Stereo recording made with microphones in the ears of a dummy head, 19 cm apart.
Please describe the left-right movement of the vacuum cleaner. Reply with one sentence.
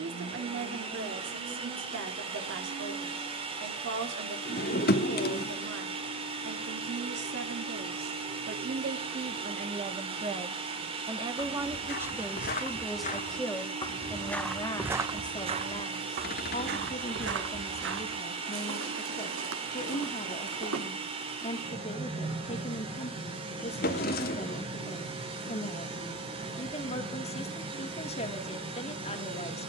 In this clip you hear the vacuum cleaner stay in one place.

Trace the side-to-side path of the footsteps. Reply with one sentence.
In this clip you hear the footsteps move from left to right.